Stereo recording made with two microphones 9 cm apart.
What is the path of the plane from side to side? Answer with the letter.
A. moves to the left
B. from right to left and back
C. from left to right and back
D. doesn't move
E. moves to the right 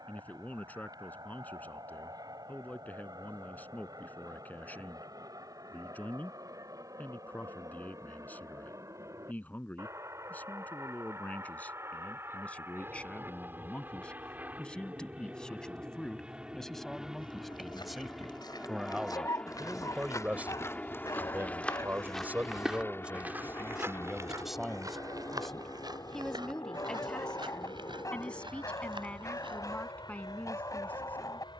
A.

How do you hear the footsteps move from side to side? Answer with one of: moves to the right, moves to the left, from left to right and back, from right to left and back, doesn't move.
moves to the right.